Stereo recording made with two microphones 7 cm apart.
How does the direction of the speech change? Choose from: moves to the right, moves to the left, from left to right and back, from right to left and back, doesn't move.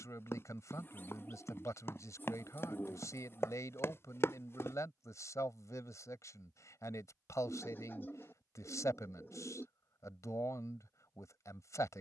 doesn't move.